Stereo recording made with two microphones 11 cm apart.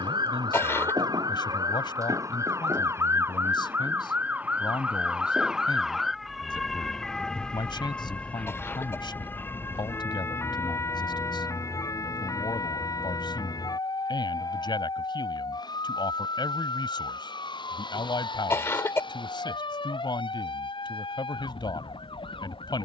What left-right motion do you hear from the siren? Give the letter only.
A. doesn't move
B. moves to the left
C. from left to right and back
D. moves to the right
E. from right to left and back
B.